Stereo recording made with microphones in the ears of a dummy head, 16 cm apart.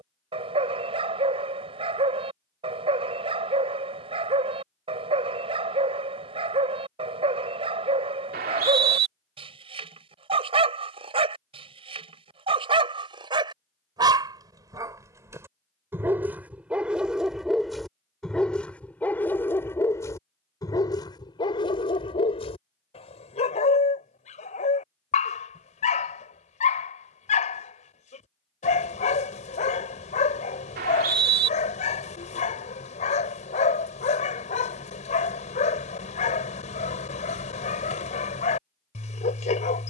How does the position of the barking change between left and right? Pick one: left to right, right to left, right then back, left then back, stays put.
right to left.